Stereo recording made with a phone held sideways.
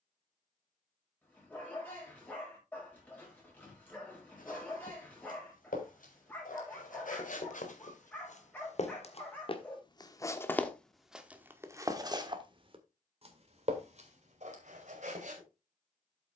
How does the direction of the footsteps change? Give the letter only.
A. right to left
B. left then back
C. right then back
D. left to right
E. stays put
D.